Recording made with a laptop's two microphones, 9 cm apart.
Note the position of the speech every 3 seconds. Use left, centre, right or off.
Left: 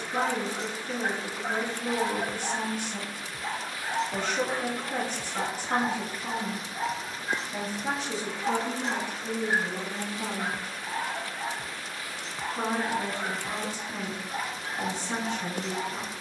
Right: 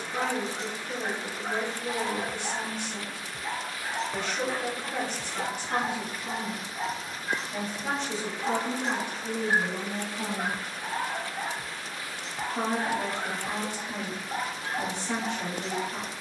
left, left, centre, right, right, right.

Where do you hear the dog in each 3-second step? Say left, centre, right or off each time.
left, left, centre, right, right, right.